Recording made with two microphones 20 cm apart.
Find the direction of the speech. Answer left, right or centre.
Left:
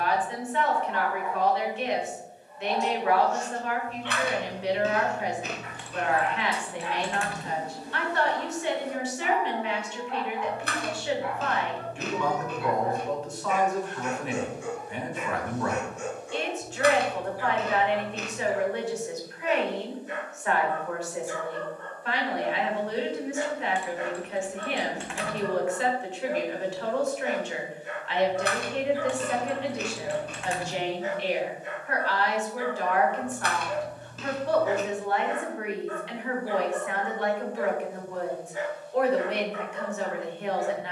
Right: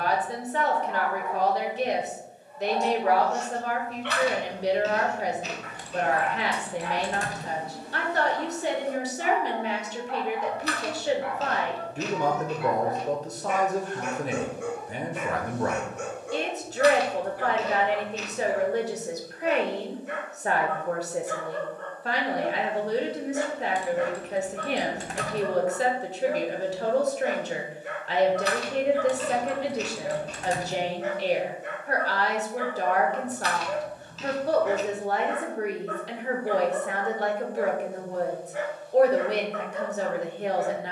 right.